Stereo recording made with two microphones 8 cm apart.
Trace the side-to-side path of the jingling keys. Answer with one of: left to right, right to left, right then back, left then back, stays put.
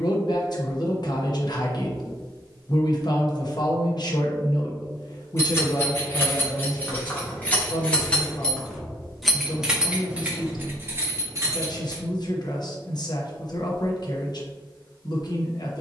left to right.